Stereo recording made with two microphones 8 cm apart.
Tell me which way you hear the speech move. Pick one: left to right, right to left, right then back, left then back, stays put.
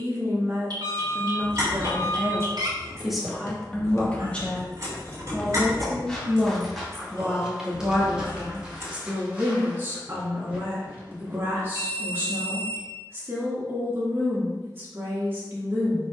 left then back.